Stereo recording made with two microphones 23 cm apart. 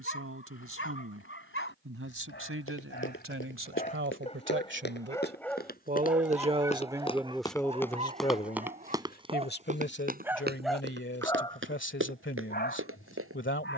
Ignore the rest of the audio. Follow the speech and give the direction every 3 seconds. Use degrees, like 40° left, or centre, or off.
70° right, 60° right, centre, 50° left, 60° left.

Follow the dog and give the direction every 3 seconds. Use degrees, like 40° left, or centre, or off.
60° left, 30° left, 20° right, centre, 50° left.